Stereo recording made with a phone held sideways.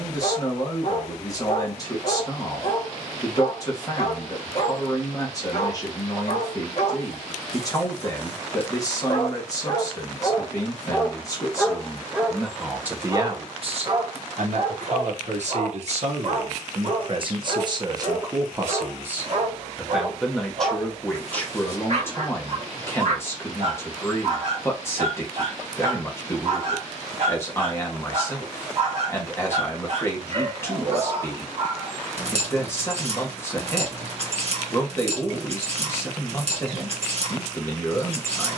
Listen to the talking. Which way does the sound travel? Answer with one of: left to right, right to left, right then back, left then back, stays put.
right then back.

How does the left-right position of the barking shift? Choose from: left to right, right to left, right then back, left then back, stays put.
left to right.